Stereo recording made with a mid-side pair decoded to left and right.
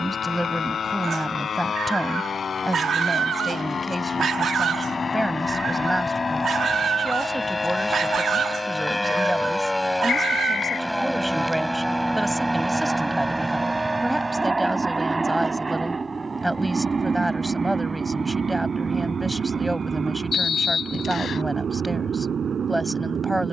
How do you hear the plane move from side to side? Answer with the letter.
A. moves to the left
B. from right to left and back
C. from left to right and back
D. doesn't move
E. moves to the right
E.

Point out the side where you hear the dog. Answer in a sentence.
In this clip you hear the dog on the right.